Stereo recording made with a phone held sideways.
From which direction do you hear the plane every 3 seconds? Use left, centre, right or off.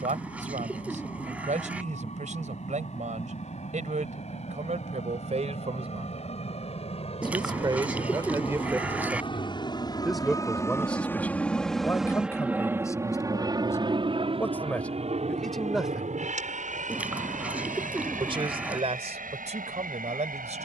left, left, left, left, right, right, right.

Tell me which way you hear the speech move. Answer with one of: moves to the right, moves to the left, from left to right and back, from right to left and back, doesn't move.
from right to left and back.